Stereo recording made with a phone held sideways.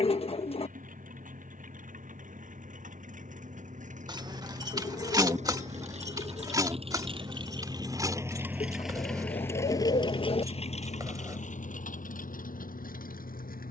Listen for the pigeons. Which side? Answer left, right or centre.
left.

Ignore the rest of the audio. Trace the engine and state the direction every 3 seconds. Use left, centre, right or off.
right, right, right, left, left.